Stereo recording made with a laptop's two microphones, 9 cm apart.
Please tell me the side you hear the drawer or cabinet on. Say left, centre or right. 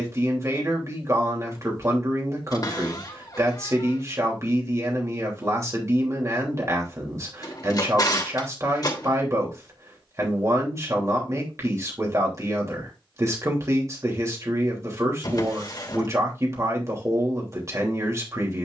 left.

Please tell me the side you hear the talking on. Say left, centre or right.
right.